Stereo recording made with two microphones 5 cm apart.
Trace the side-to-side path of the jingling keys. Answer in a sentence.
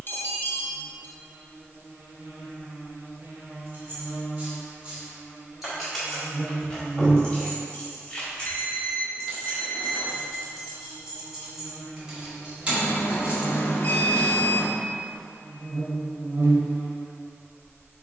You can hear the jingling keys go left and come back.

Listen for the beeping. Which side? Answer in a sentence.
You can hear the beeping on the left.